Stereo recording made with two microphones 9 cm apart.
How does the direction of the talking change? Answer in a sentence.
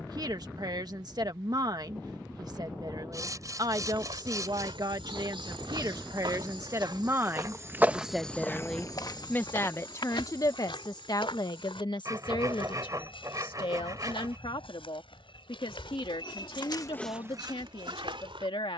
In this clip you hear the talking travel towards the left.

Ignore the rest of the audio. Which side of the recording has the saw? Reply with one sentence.
In this clip you hear the saw on the right.